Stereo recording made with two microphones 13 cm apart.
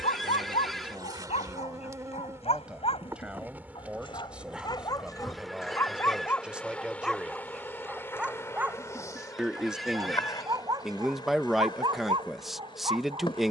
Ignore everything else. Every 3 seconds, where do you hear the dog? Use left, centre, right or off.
left, left, centre, right, right.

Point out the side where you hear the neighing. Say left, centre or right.
centre.